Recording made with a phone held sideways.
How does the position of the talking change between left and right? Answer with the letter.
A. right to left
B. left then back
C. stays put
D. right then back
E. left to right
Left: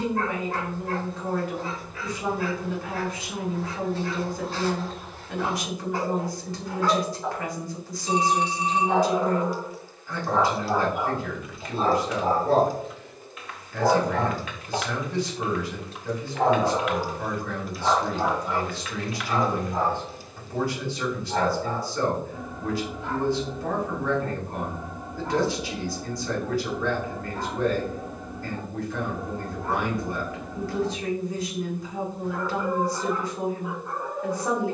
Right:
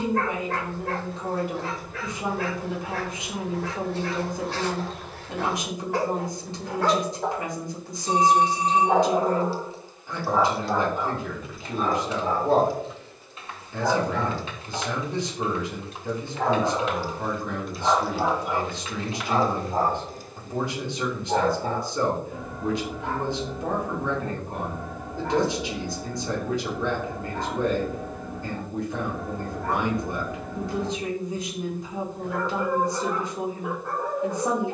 C.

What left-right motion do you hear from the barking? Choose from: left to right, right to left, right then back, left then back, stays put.
left then back.